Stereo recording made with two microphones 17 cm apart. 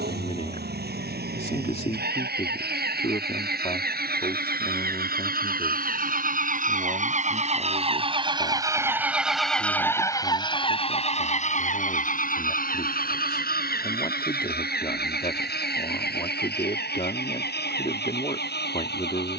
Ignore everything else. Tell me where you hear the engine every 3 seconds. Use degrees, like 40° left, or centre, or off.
80° right, 70° right, 40° right, 20° left, 60° left, 70° left, 80° left.